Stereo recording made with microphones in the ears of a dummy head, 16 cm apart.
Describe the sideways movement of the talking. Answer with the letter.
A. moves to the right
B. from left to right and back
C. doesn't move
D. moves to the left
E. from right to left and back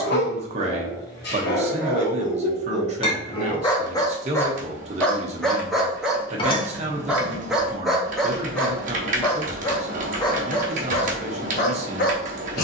C.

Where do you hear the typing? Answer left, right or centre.
right.